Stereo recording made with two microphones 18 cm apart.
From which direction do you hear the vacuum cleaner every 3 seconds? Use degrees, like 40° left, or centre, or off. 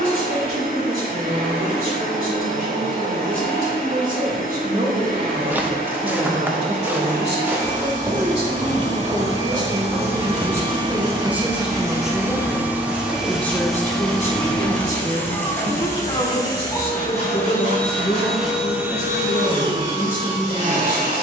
50° right, 50° right, 50° right, 30° right, centre, 20° left, 20° right.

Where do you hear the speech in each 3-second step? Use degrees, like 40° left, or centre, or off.
60° right, 50° right, 40° right, 20° right, 10° left, 30° left, 50° left.